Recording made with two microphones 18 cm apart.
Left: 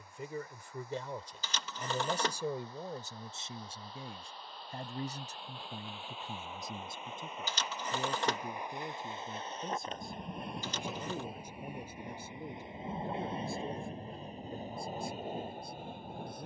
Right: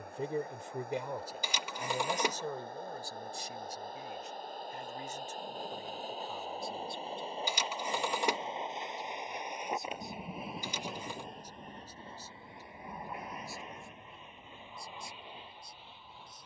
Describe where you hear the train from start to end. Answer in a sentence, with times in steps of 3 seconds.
In this clip you hear the train on the right from 0 s, in the centre from 9 s and on the left from 12 s.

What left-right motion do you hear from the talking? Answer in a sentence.
In this clip you hear the talking move to the left.